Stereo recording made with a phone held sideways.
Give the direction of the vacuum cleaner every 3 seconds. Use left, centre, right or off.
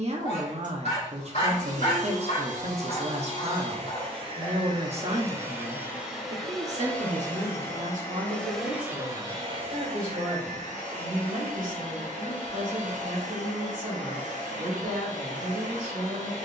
right, right, centre, right, right, right.